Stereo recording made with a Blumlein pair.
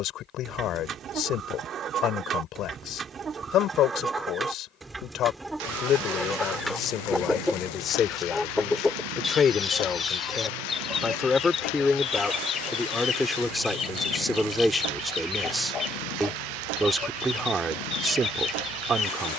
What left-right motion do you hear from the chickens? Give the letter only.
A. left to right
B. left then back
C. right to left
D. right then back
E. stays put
C.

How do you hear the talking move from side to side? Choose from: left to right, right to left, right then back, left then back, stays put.
left to right.